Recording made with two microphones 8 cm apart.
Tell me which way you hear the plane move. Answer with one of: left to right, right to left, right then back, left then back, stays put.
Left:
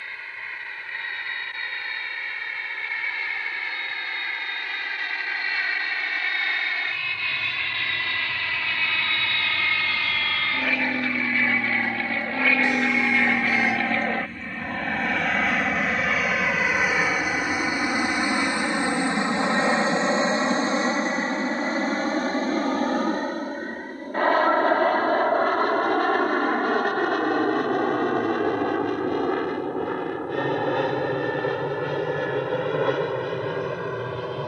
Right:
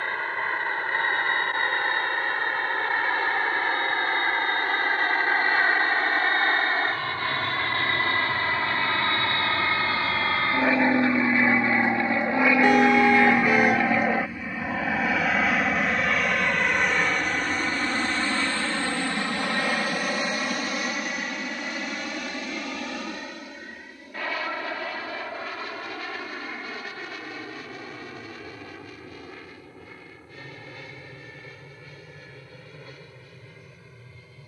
right to left.